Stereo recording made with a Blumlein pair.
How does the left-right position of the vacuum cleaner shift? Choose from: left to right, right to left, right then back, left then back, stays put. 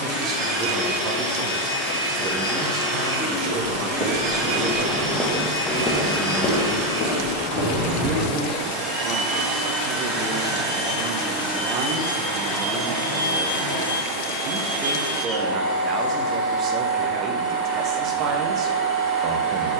stays put.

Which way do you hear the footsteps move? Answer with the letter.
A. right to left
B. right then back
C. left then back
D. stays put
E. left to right
A.